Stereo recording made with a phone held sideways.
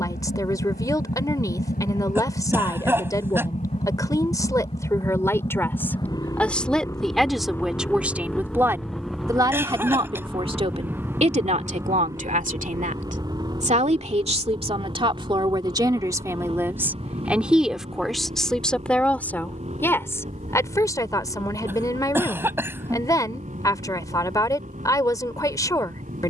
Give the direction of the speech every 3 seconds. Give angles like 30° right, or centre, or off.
20° left, 20° left, centre, 40° right, 50° right, 20° right, 10° left, 20° left, 20° left.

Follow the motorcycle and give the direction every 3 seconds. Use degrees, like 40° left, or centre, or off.
60° left, 40° left, 10° left, 10° right, 20° right, 30° right, 40° right, 50° right, 50° right.